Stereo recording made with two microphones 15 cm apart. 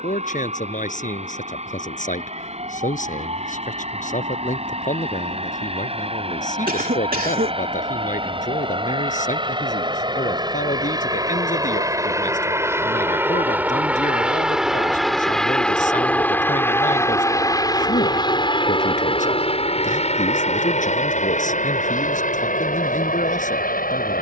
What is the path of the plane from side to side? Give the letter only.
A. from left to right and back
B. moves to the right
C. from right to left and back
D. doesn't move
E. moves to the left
E.